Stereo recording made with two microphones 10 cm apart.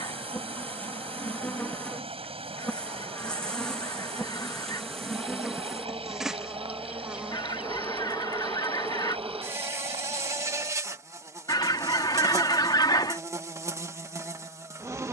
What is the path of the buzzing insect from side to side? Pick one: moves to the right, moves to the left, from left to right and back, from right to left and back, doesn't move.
moves to the right.